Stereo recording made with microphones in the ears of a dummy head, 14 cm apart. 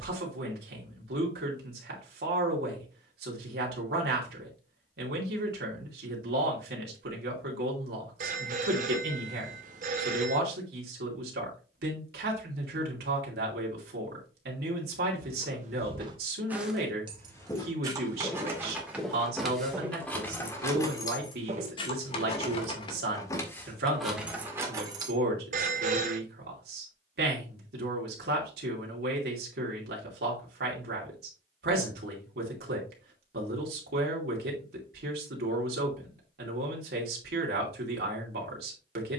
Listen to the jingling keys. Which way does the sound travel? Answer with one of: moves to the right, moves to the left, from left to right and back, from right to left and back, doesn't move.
from right to left and back.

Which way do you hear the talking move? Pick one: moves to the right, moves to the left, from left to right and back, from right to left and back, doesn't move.
doesn't move.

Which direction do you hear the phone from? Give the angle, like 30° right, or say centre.
50° right.